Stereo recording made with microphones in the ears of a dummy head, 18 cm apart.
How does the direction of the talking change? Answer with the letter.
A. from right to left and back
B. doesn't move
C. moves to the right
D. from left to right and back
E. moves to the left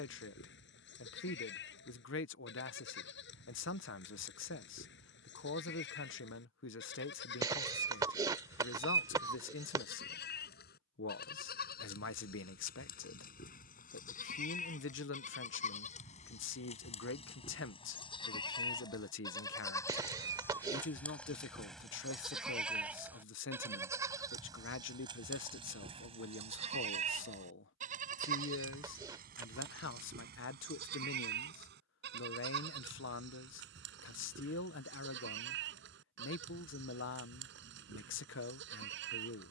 B.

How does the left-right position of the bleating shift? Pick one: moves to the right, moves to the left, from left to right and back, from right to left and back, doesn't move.
moves to the right.